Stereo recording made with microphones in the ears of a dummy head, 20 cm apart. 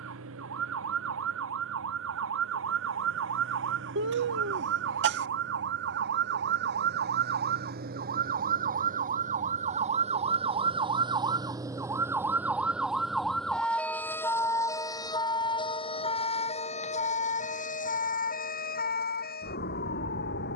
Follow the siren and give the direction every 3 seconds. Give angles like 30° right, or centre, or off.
70° right, 60° right, 50° right, 30° right, centre, 30° left, 50° left.